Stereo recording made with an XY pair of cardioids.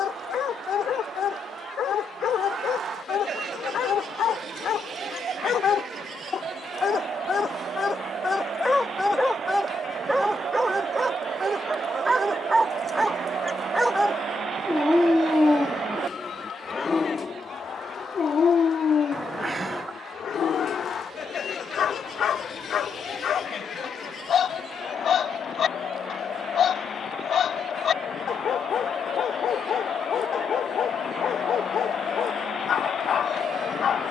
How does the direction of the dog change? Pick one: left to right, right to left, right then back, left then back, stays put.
right then back.